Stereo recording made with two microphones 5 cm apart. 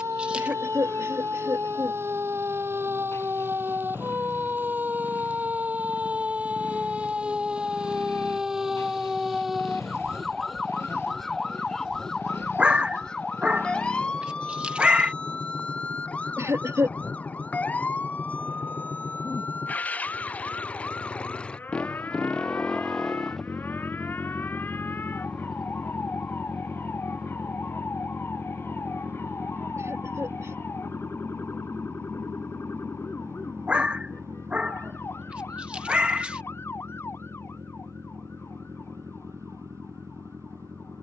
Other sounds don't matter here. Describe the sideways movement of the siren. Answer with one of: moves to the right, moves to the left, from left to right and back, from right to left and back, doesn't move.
moves to the left.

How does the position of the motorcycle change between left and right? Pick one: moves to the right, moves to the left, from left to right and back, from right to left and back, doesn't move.
moves to the right.